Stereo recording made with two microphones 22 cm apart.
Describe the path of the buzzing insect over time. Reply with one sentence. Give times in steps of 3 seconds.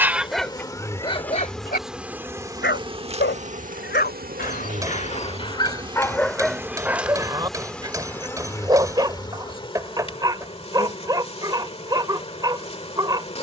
In this clip you hear the buzzing insect in the centre from 0 s, on the right from 3 s, in the centre from 6 s and on the left from 9 s.